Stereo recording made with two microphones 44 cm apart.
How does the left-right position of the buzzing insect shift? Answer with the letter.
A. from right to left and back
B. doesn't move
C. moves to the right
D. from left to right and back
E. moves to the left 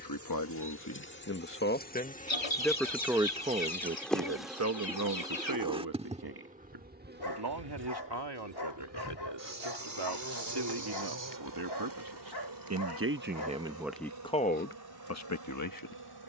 C.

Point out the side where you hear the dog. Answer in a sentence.
In this clip you hear the dog on the left.